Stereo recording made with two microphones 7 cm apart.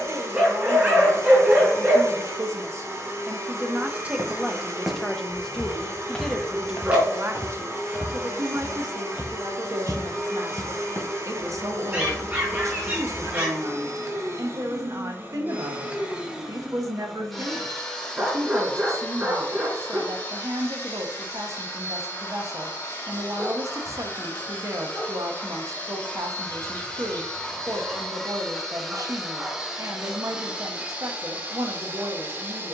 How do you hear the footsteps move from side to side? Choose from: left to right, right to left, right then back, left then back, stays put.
left then back.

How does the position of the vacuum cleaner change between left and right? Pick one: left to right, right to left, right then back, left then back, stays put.
left then back.